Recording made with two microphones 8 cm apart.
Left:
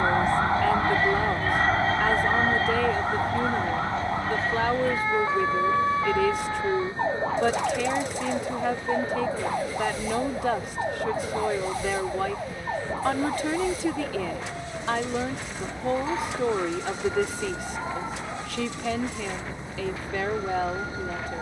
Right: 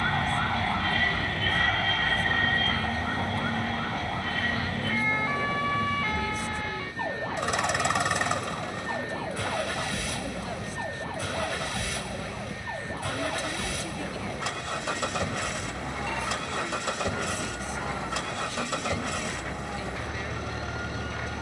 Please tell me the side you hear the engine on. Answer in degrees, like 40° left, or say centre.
70° right.